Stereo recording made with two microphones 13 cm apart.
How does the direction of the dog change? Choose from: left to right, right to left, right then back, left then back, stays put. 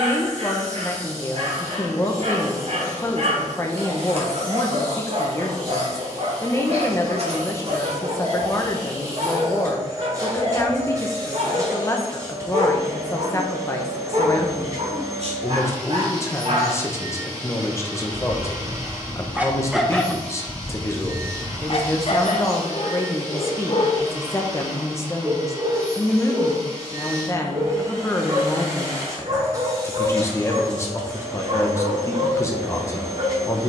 left then back.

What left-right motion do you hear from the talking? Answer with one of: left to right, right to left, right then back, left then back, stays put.
stays put.